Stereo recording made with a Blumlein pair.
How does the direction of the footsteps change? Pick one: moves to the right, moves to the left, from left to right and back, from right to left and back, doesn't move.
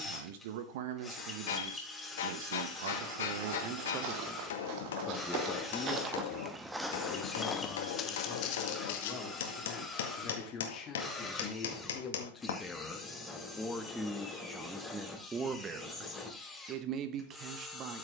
moves to the left.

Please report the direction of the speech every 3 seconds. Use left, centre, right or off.
right, right, left, left, centre, right.